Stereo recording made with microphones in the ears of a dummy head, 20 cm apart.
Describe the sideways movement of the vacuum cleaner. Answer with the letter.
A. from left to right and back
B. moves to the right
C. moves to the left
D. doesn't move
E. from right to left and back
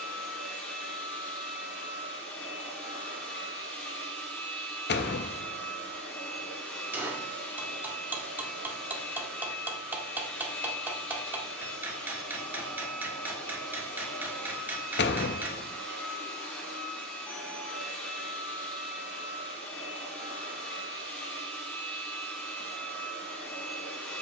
D.